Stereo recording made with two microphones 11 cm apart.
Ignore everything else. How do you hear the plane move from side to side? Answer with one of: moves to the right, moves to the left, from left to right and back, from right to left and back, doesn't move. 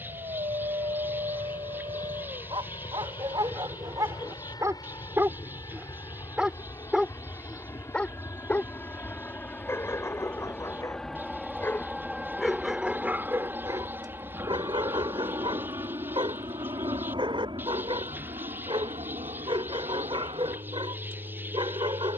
moves to the right.